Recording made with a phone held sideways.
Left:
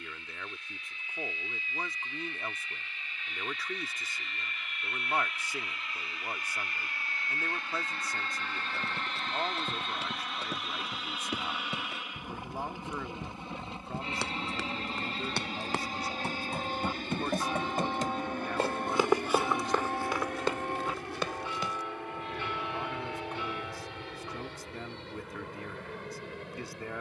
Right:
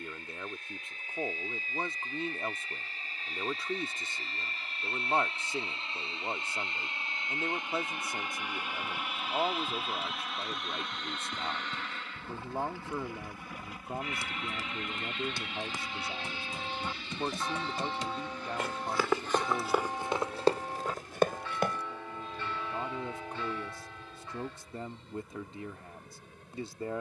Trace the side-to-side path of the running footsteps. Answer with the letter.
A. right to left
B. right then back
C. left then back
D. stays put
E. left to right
E.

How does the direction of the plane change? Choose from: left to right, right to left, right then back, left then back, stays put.
right to left.